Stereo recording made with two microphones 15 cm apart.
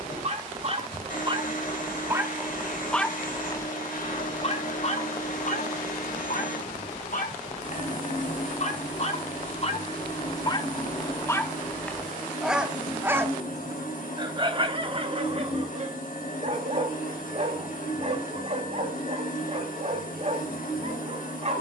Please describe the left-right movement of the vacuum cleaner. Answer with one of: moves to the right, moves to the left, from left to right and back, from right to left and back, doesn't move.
doesn't move.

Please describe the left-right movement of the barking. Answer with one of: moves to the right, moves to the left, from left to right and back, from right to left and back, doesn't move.
from right to left and back.